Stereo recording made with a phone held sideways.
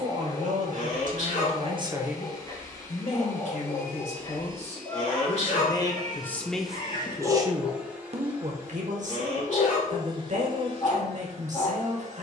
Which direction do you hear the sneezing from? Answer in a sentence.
In this clip you hear the sneezing on the left.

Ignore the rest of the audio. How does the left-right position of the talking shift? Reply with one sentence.
You can hear the talking move from right to left and back again.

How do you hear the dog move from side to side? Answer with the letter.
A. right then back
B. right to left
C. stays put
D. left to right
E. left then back
C.